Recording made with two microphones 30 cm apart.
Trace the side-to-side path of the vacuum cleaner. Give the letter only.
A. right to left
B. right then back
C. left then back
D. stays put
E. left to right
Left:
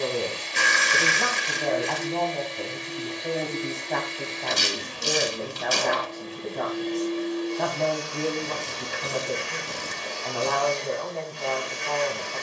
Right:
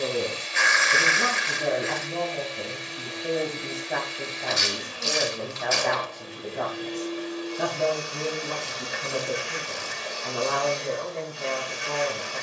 D.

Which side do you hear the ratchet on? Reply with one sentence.
In this clip you hear the ratchet on the left.